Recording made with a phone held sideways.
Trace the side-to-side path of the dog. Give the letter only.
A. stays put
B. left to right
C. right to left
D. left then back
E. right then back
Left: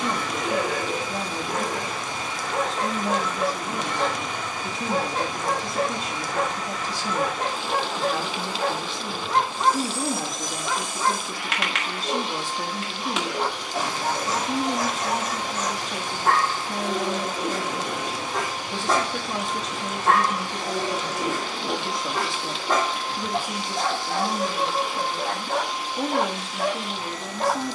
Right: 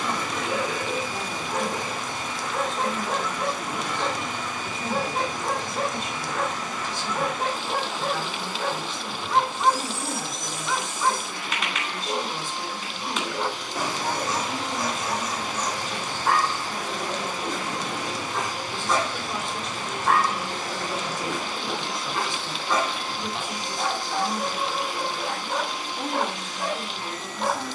A.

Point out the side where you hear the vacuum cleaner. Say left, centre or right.
left.